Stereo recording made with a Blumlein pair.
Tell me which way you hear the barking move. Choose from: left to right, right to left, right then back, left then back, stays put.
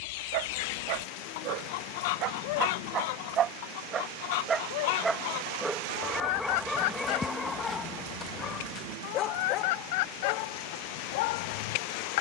right to left.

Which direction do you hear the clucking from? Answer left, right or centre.
left.